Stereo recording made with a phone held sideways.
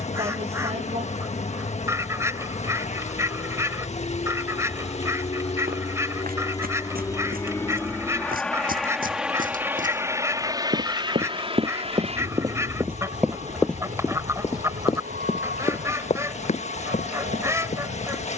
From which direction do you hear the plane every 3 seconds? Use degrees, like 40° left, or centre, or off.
60° left, 50° left, 20° left, 20° right, 50° right, 60° right.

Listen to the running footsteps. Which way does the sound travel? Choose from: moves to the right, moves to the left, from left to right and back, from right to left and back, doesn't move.
moves to the left.